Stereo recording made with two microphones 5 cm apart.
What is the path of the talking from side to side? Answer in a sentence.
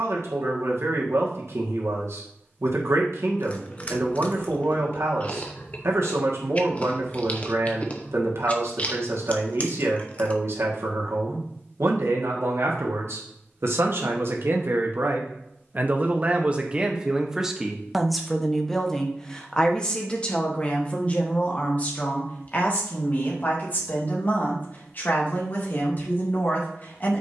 You can hear the talking move from right to left.